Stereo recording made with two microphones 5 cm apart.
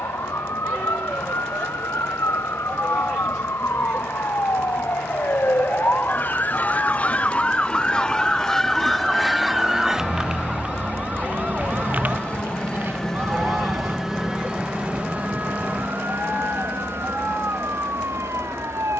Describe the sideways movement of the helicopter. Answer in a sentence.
You can hear the helicopter go from the left side to the right.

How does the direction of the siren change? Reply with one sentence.
In this clip you hear the siren travel towards the right.